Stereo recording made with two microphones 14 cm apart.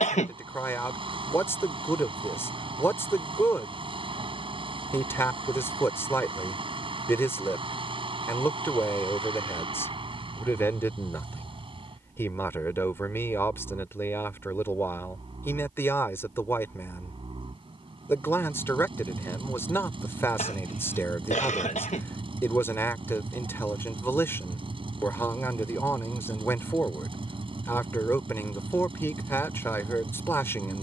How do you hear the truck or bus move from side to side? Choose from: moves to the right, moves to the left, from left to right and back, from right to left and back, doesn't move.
doesn't move.